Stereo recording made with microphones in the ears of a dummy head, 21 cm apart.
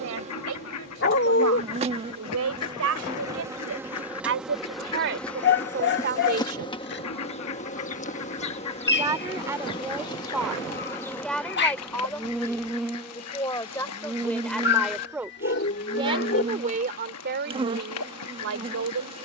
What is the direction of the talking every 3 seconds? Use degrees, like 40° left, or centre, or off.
70° right, 60° right, 40° right, centre, 10° left, 30° right, 60° right.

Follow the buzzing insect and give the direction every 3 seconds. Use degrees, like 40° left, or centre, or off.
20° right, centre, 30° left, 10° left, 10° right, 20° right, 20° right.